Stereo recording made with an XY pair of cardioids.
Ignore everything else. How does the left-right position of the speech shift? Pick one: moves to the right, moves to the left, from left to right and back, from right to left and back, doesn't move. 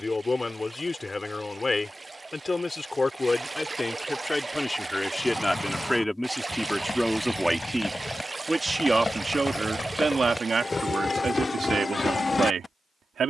moves to the right.